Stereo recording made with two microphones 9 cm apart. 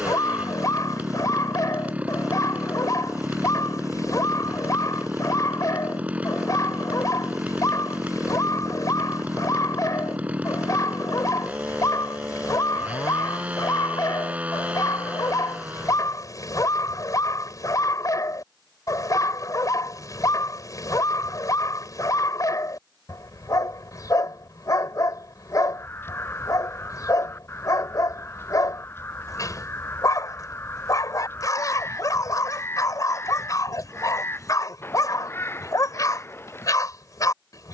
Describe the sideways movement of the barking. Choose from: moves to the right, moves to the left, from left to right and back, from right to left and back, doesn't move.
doesn't move.